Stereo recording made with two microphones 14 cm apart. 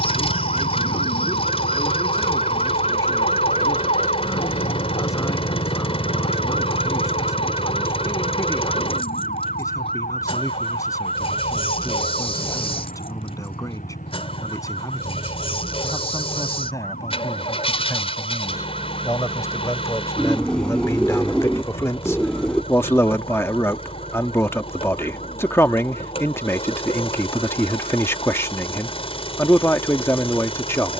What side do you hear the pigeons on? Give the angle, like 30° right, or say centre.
10° left.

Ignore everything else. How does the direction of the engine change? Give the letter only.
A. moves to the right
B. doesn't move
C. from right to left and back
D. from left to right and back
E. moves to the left
B.